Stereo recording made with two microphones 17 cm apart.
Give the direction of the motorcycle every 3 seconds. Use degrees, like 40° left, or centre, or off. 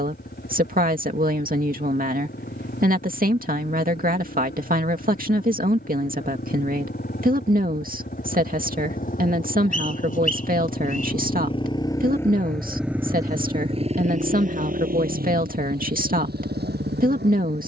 70° left, 70° left, 60° left, 40° left, 20° right, 70° right.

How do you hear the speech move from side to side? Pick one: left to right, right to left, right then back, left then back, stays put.
stays put.